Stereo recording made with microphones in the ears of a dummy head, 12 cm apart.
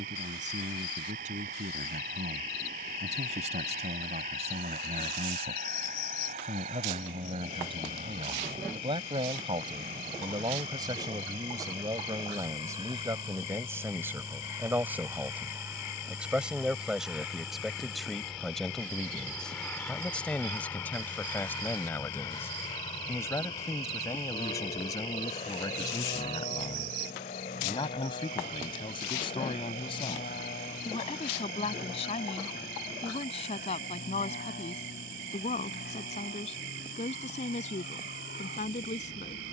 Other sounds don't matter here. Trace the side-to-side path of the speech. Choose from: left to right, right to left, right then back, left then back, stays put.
right to left.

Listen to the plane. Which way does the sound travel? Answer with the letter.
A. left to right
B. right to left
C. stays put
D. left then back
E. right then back
B.